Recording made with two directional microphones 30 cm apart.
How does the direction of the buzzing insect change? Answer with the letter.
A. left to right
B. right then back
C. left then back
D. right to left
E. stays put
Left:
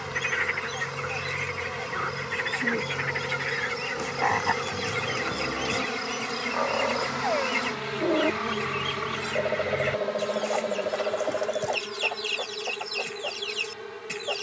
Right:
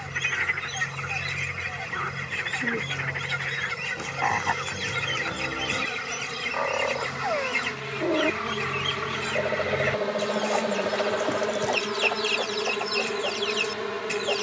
A.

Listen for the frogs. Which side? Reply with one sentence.
You can hear the frogs in the centre.